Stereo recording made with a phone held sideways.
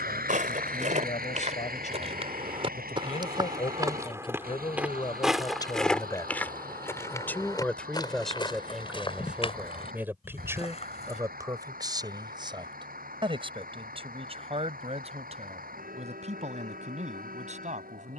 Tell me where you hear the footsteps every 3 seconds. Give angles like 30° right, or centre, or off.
50° right, 10° right, 20° left, 40° left, off, off.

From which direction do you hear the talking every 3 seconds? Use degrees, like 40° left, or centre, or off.
50° left, 30° left, 10° left, 20° right, 30° right, 50° right.